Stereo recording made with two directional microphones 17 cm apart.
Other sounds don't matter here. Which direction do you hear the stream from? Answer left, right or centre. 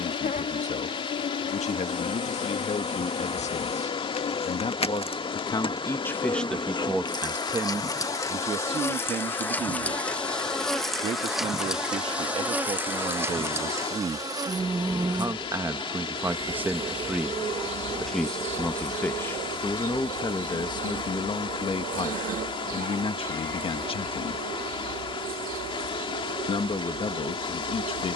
left.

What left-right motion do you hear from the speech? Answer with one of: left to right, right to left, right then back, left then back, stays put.
right then back.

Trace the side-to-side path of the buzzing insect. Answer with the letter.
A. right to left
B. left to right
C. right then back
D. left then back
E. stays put
B.